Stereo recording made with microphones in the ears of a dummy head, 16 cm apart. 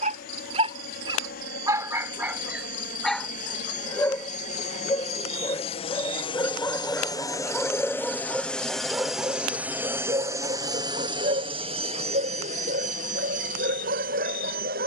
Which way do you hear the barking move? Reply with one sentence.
In this clip you hear the barking move from right to left and back again.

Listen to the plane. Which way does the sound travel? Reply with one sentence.
You can hear the plane move to the right.